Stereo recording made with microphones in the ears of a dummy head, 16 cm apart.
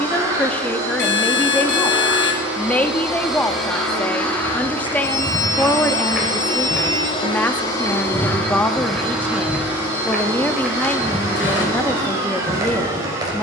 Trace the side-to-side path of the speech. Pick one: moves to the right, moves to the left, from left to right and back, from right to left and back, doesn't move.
doesn't move.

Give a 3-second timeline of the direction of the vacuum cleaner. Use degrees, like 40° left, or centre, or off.
10° right, 10° left, 20° left, 20° right, 20° right.